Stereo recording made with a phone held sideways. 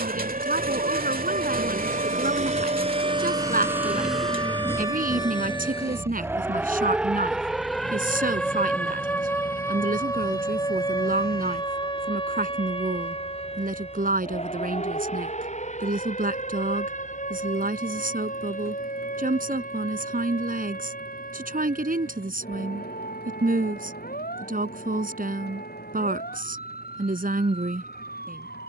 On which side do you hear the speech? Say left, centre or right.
right.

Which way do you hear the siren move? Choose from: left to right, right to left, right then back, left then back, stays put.
right to left.